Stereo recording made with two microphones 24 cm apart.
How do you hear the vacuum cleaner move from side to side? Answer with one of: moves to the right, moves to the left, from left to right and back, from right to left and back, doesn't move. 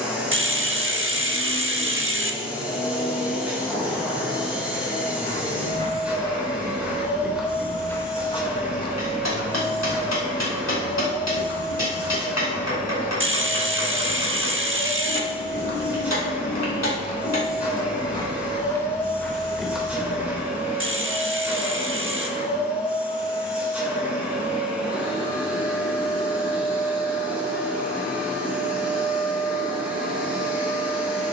doesn't move.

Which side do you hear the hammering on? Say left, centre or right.
left.